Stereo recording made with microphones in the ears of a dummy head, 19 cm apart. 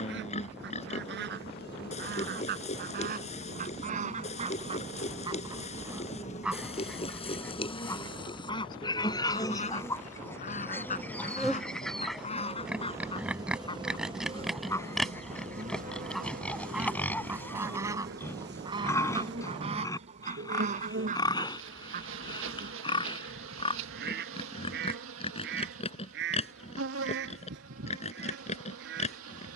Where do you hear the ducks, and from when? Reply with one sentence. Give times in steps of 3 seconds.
In this clip you hear the ducks on the right from 0 s, in the centre from 6 s, on the left from 9 s, in the centre from 15 s and on the right from 18 s.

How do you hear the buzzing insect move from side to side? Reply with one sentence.
You can hear the buzzing insect travel towards the right.